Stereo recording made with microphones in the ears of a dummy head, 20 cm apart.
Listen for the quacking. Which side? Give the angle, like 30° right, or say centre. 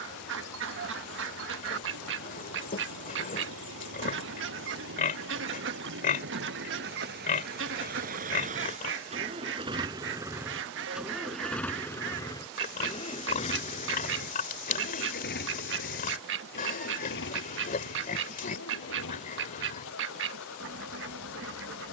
60° right.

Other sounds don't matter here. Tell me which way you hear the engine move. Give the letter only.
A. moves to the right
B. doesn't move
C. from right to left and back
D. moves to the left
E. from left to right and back
D.